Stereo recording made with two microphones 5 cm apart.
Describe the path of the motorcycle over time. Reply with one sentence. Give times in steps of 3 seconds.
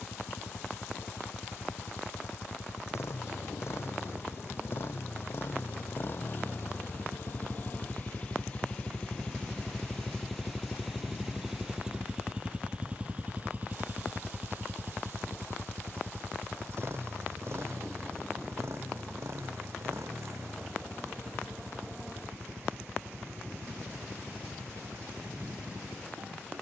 You can hear the motorcycle on the left from 0 s, in the centre from 9 s and on the right from 12 s.